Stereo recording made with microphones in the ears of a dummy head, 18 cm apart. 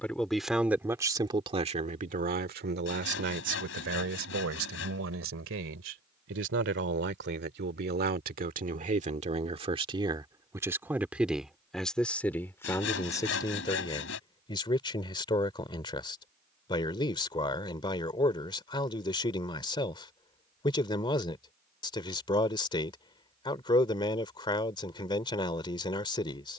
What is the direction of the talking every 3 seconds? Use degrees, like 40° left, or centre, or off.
30° right, 70° right, 50° right, 20° right, 20° left, 20° left, 20° left, 20° left, 20° left.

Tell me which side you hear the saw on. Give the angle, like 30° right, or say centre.
70° left.